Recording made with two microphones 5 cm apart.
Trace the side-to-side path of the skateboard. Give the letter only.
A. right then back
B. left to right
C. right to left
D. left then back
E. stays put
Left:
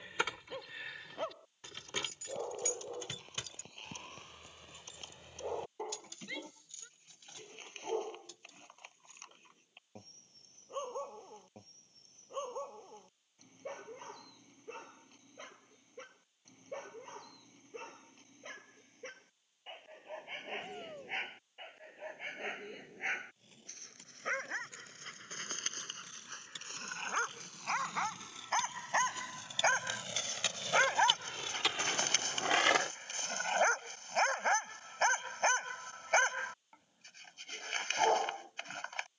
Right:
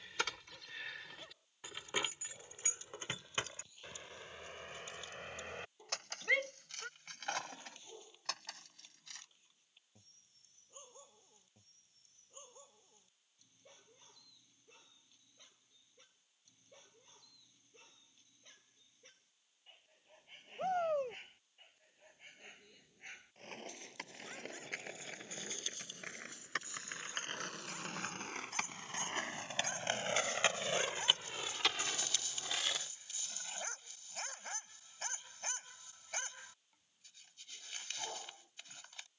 C.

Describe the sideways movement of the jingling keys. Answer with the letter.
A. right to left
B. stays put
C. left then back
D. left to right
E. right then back
D.